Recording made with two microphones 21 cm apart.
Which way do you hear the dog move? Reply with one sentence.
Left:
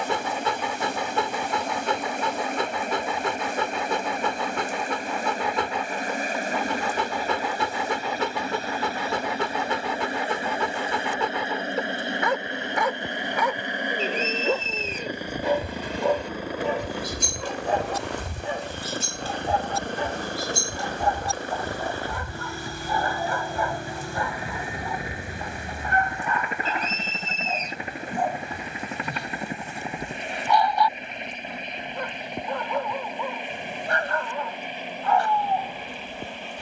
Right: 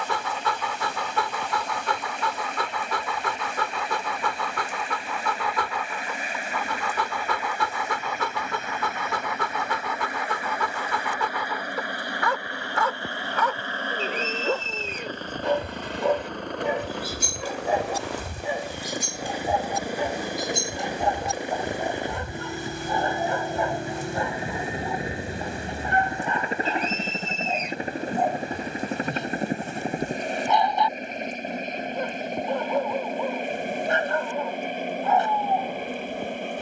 You can hear the dog go from the left side to the right.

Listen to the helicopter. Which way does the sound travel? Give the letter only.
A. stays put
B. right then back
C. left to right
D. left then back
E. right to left
C.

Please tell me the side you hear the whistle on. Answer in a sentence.
In this clip you hear the whistle on the left.